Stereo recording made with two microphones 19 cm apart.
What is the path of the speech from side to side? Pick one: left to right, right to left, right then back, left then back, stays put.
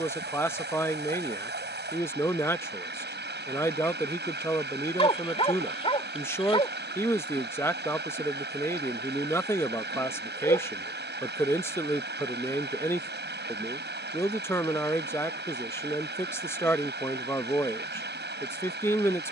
stays put.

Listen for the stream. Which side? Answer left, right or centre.
right.